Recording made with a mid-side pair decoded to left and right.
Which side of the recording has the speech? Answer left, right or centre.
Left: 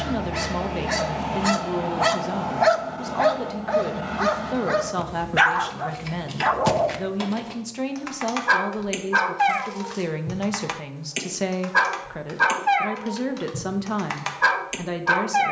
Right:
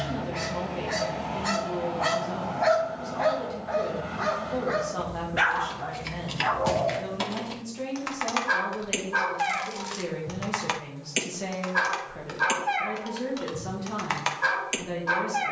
left.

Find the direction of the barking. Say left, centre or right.
left.